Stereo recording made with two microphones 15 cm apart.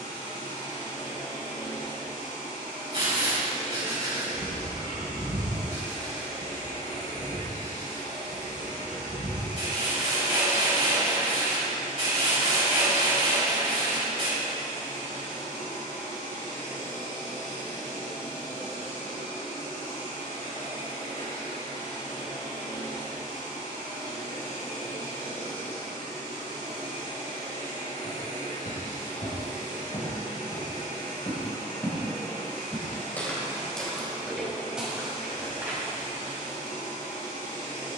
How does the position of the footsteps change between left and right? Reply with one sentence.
In this clip you hear the footsteps move to the right.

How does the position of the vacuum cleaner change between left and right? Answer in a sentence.
In this clip you hear the vacuum cleaner stay put.